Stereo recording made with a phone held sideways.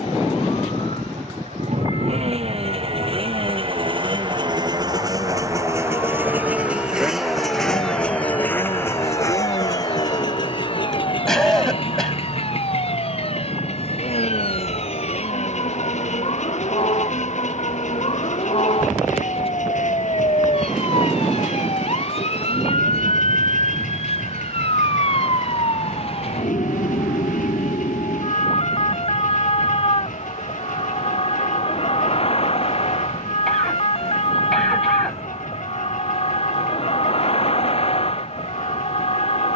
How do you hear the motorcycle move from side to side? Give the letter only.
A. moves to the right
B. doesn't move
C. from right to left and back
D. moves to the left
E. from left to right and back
D.